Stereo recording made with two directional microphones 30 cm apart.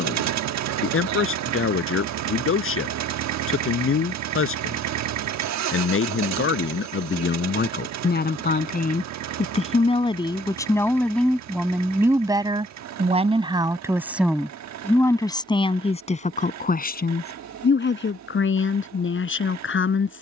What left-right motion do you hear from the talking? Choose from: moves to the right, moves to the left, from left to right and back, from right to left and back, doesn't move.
from left to right and back.